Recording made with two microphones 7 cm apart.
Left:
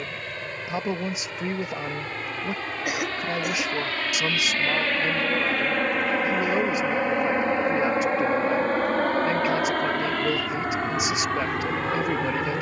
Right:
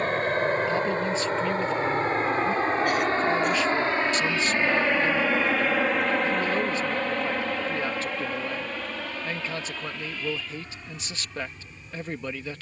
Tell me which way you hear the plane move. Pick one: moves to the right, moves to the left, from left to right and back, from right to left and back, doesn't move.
moves to the left.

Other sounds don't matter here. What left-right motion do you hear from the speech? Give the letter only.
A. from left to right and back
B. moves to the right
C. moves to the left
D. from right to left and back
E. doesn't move
E.